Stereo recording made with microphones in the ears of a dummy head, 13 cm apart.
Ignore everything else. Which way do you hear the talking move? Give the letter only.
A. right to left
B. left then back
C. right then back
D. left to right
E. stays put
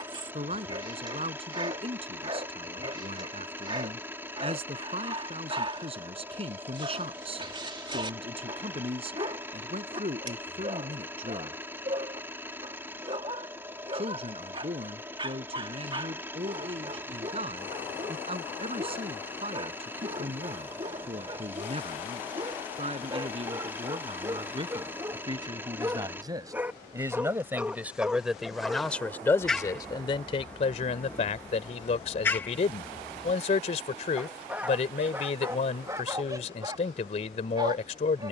A.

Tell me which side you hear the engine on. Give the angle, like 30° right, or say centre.
20° right.